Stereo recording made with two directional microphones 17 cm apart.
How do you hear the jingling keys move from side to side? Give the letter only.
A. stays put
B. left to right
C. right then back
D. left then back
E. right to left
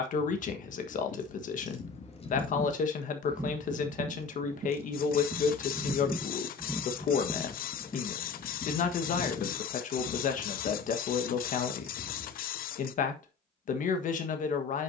C.